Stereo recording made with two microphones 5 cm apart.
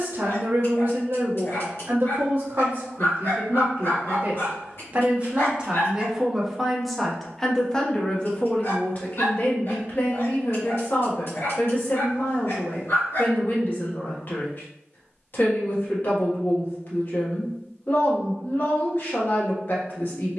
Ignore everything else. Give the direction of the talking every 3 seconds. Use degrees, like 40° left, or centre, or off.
50° right, 40° right, 10° left, 40° left, 50° left, 50° left, 50° left.